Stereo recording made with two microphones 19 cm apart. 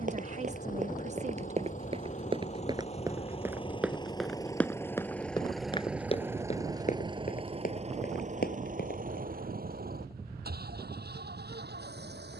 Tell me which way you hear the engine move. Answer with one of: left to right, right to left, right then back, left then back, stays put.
left to right.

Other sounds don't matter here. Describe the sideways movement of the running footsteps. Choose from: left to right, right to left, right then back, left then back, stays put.
right to left.